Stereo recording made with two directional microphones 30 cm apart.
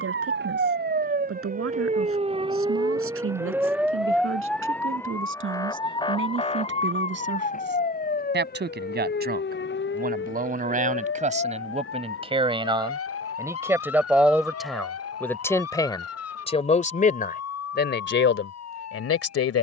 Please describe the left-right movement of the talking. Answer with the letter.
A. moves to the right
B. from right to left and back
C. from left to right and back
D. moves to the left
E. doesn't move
D.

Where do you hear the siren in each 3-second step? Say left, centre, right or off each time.
right, centre, left, left, left, left, left.